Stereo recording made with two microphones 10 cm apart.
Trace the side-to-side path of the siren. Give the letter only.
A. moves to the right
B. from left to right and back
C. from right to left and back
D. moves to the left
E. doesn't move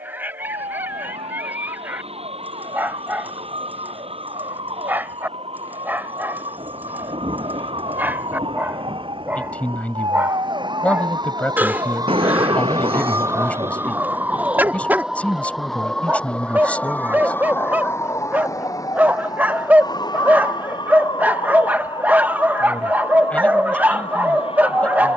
D.